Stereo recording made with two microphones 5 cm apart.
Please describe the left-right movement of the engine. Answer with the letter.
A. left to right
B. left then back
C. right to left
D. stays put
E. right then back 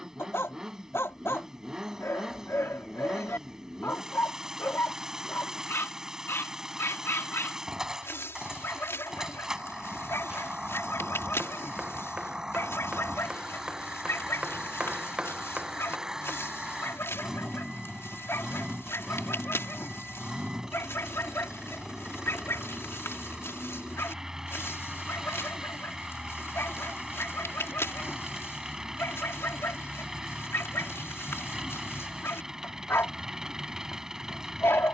D.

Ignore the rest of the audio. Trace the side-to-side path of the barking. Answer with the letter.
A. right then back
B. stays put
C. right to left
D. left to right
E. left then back
B.